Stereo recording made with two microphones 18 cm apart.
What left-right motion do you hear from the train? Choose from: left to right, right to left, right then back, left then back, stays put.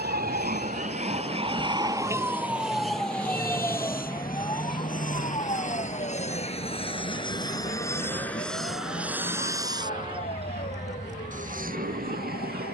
left to right.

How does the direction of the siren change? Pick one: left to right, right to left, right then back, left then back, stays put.
right to left.